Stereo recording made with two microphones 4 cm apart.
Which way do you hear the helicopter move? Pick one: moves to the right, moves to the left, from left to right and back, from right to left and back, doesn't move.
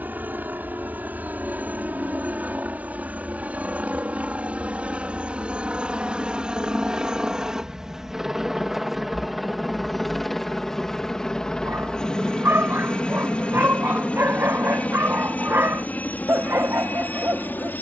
moves to the left.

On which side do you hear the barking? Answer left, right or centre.
right.